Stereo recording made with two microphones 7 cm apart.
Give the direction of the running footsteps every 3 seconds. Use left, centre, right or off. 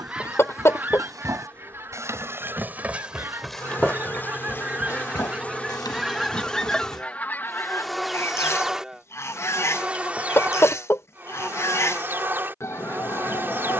right, left, left, off, off.